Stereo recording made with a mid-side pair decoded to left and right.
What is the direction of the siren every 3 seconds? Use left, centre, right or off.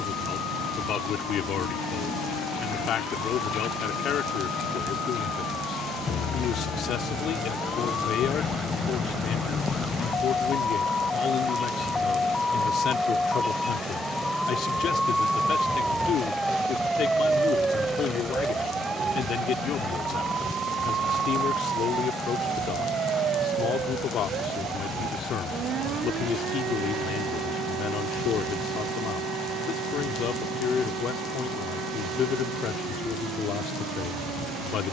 left, left, left, left, centre, centre, right, right, right, right, right, right.